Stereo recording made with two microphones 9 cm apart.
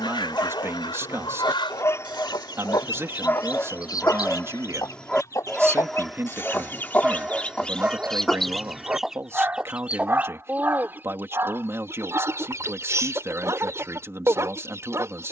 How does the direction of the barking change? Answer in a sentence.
You can hear the barking move from left to right.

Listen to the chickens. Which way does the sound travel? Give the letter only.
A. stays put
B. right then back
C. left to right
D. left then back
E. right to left
C.